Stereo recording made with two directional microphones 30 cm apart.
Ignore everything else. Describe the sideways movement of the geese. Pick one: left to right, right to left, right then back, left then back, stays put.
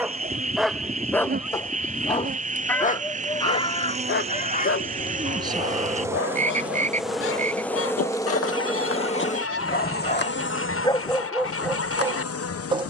right to left.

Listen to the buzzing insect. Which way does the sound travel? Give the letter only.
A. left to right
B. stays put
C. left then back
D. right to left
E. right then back
D.